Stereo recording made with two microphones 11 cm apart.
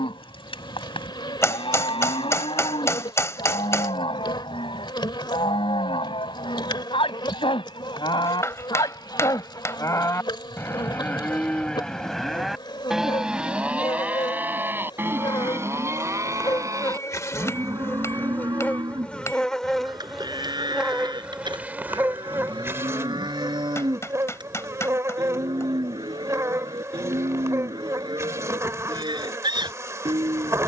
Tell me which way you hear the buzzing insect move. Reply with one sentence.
In this clip you hear the buzzing insect move to the right.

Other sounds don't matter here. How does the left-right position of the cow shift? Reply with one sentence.
You can hear the cow move from left to right.